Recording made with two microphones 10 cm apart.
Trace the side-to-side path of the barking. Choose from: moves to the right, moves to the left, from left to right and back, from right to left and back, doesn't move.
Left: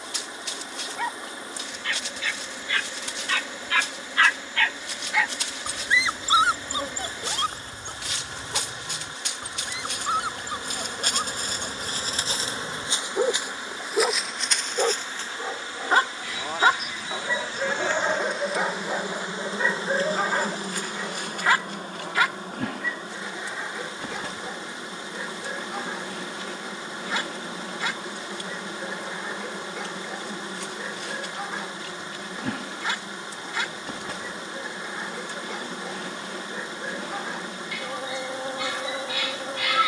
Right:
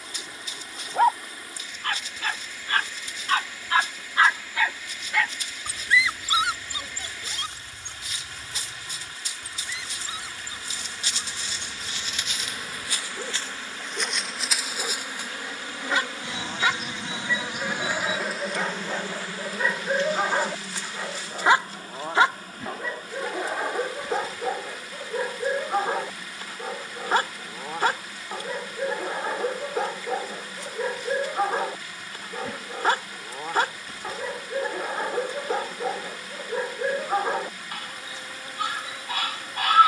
from right to left and back.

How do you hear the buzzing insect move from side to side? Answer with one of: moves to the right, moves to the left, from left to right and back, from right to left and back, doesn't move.
from left to right and back.